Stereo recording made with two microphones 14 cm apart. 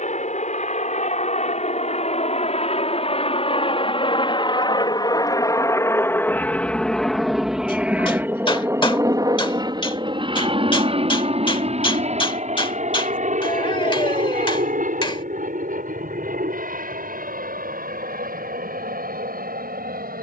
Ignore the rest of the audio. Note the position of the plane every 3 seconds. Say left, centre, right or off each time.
left, left, centre, right, right, right, right.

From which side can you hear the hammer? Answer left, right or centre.
left.